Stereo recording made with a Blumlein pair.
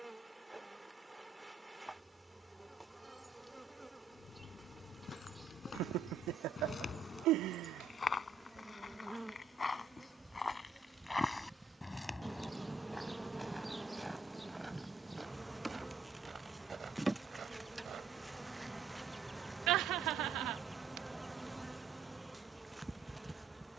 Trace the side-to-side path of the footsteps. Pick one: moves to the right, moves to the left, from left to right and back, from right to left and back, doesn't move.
moves to the right.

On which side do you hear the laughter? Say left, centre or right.
right.